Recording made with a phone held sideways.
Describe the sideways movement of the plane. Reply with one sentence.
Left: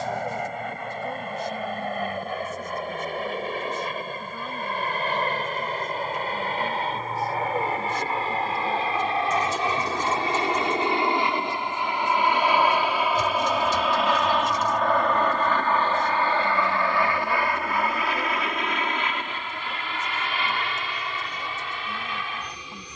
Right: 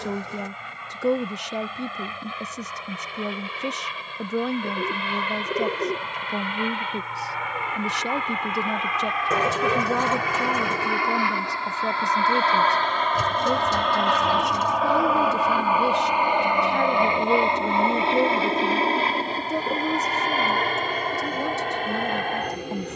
You can hear the plane travel towards the right.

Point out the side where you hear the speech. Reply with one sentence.
In this clip you hear the speech on the right.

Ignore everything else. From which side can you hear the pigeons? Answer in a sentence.
You can hear the pigeons on the right.